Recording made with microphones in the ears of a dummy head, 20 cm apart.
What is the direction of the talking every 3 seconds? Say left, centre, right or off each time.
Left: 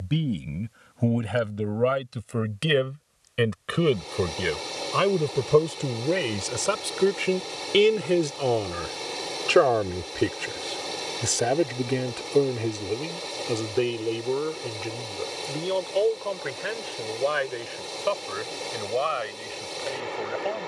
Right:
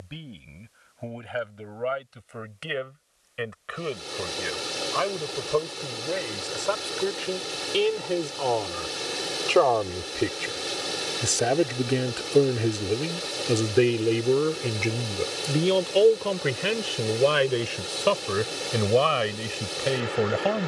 left, left, left, centre, right, right, right.